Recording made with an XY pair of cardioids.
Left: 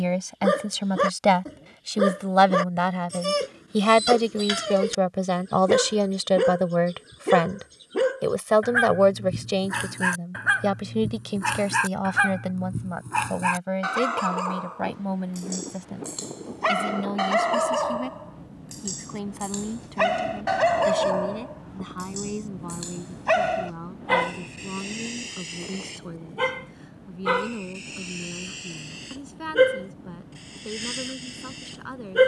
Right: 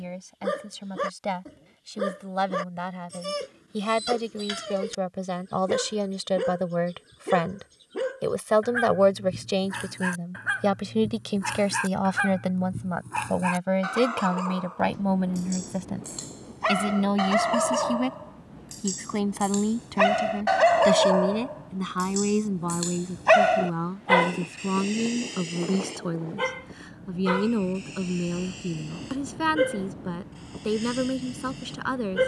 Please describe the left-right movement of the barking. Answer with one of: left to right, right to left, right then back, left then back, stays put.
right then back.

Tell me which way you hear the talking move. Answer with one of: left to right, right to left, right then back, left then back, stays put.
left to right.